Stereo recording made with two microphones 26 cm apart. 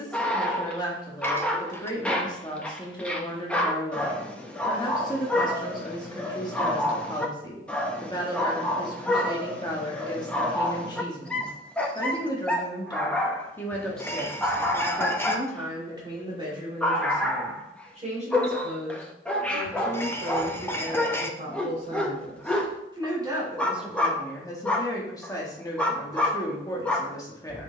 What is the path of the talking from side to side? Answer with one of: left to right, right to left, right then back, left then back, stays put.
right then back.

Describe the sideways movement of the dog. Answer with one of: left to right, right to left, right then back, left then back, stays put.
stays put.